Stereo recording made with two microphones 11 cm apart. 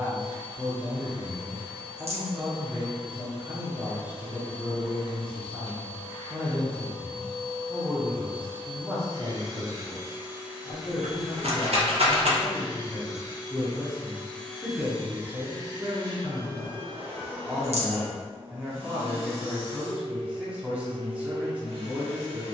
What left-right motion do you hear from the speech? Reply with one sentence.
In this clip you hear the speech move from right to left and back again.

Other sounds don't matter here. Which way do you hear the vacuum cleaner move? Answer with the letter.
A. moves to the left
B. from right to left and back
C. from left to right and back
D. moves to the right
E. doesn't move
B.